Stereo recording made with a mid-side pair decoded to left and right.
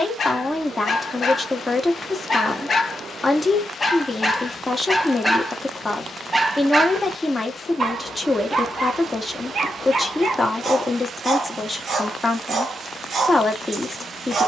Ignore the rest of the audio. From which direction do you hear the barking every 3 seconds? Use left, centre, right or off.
left, centre, right, right, right.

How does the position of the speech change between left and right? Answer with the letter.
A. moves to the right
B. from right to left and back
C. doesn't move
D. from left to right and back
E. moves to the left
C.